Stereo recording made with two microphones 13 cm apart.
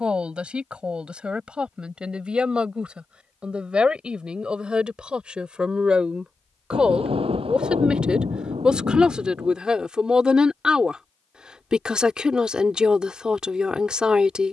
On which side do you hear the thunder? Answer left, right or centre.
right.